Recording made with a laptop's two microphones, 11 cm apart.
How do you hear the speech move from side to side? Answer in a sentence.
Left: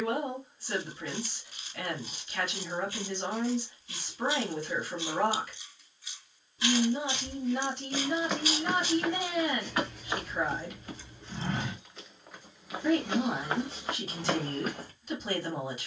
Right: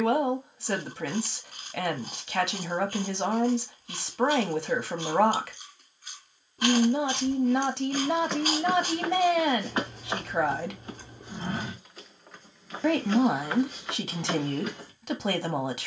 You can hear the speech stay put.